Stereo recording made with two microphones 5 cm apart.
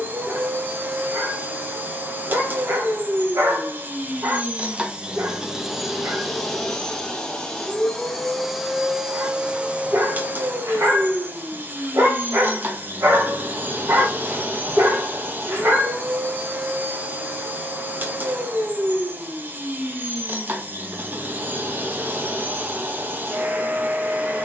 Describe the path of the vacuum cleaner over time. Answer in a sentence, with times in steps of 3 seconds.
In this clip you hear the vacuum cleaner on the right from 0 s, in the centre from 6 s and on the right from 9 s.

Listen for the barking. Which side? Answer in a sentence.
You can hear the barking on the right.